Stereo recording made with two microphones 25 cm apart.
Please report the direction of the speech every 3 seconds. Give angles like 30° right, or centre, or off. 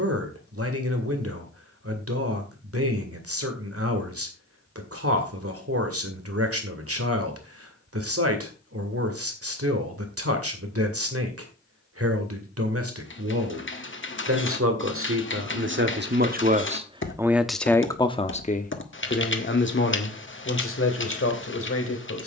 70° right, 70° right, 70° right, 70° right, 70° right, 30° right, 40° left, 60° left.